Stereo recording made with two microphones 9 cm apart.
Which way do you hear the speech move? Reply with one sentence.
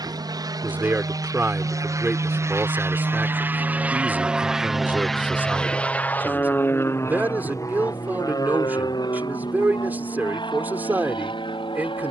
You can hear the speech stay in one place.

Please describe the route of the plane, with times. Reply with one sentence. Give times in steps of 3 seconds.
In this clip you hear the plane on the right from 0 s, in the centre from 3 s and on the left from 6 s.